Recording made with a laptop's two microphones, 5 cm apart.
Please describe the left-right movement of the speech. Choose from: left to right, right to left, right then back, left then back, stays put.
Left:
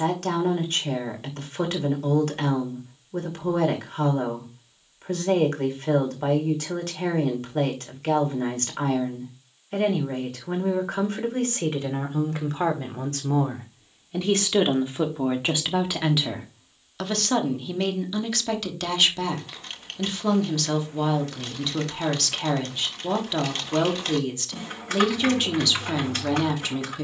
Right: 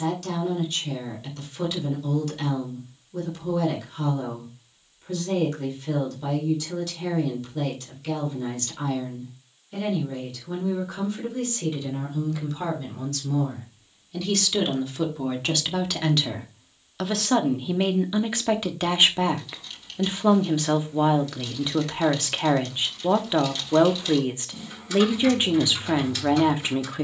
left to right.